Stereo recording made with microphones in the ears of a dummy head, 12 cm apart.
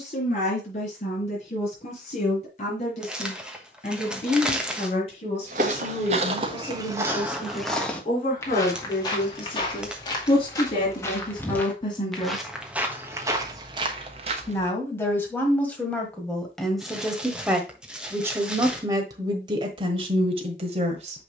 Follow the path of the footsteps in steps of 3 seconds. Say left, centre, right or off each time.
off, right, centre, left, right, off, off.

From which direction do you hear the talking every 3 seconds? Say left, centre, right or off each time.
left, left, left, left, left, centre, right.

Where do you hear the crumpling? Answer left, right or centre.
centre.